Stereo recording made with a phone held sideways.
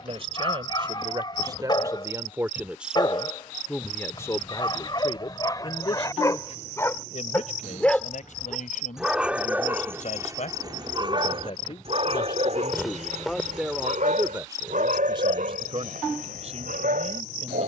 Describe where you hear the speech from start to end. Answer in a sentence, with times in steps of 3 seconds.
In this clip you hear the speech on the right from 0 s, on the left from 3 s, in the centre from 12 s and on the right from 15 s.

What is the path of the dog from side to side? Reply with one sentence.
You can hear the dog travel towards the right.